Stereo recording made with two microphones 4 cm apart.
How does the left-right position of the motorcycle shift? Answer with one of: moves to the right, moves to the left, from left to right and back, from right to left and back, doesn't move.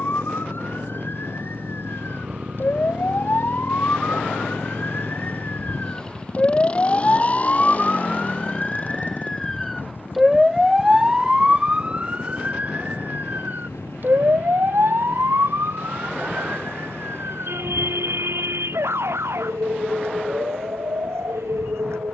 moves to the left.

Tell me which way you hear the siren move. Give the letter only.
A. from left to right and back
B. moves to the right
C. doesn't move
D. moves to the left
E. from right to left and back
B.